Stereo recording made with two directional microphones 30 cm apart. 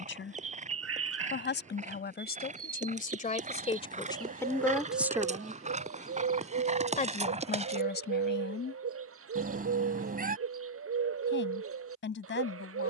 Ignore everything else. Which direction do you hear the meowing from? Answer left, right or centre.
right.